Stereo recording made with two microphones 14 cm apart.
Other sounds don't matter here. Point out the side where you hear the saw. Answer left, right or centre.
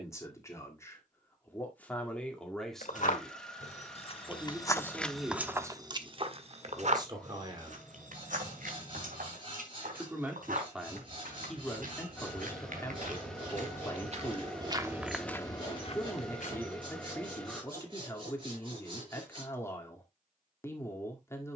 right.